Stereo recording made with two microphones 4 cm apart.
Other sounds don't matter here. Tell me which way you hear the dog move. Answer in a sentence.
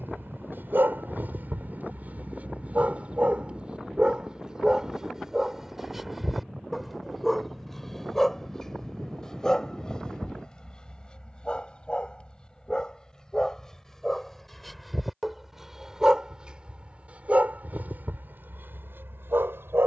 In this clip you hear the dog move from right to left and back again.